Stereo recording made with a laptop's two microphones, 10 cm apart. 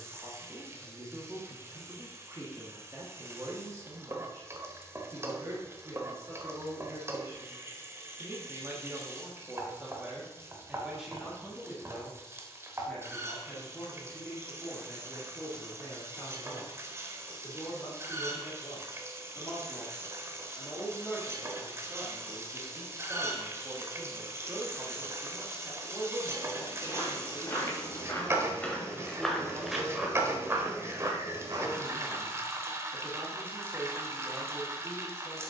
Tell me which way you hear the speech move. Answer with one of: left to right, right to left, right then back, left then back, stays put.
left then back.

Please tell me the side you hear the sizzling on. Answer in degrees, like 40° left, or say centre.
30° right.